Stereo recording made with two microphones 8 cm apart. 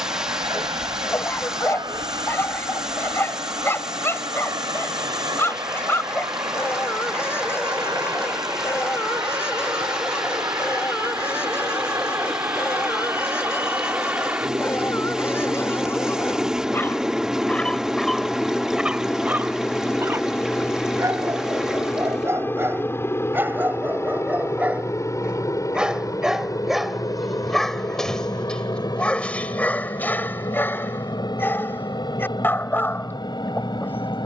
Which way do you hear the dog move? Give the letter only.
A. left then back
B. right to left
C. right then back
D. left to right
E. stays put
C.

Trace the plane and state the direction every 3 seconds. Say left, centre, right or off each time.
right, right, right, right, right, centre, centre, left, left, left, left, left.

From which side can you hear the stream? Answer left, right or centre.
centre.